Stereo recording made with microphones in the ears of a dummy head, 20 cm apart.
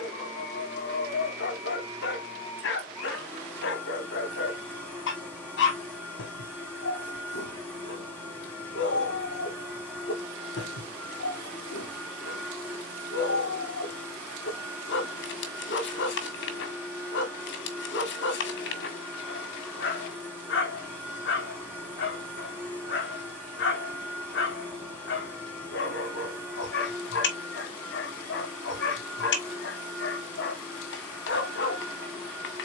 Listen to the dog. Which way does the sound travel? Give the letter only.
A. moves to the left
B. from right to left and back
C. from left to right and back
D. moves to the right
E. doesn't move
E.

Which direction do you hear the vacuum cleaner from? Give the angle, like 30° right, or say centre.
10° left.